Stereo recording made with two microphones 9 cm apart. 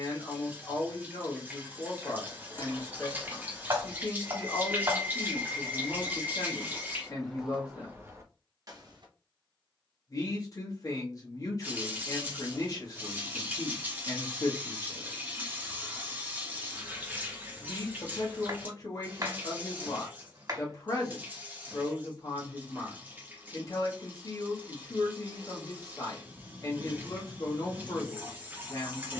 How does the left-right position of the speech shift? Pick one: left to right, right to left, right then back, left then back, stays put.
stays put.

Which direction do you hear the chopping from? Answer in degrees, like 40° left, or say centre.
40° right.